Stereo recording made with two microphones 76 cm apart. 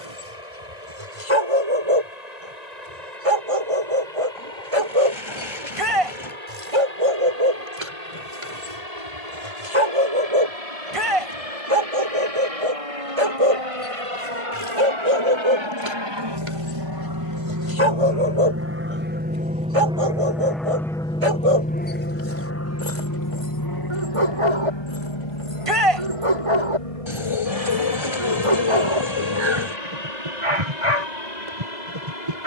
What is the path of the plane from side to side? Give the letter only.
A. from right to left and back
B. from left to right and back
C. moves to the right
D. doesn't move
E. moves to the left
E.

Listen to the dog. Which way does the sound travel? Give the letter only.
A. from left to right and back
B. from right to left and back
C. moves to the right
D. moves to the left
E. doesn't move
E.